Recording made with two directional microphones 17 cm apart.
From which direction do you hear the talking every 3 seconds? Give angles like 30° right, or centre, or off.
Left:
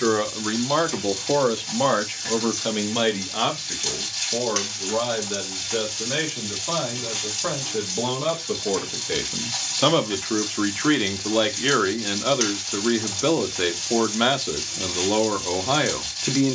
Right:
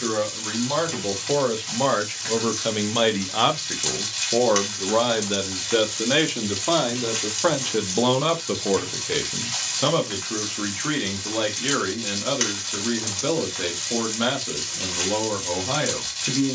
20° left, 30° right, 40° right, 20° left, 30° left, 30° left.